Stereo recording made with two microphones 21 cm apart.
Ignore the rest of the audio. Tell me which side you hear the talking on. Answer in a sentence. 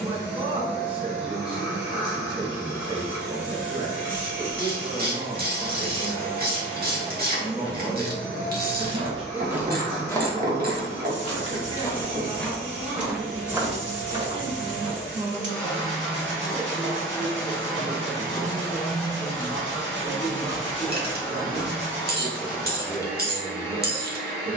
You can hear the talking on the right.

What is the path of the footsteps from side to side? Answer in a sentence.
In this clip you hear the footsteps move from right to left and back again.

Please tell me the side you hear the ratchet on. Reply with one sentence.
You can hear the ratchet on the right.